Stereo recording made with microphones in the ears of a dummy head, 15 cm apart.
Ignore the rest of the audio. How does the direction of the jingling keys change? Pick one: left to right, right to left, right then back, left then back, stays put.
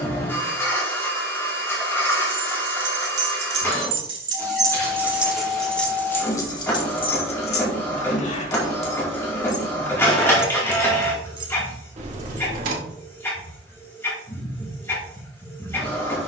left then back.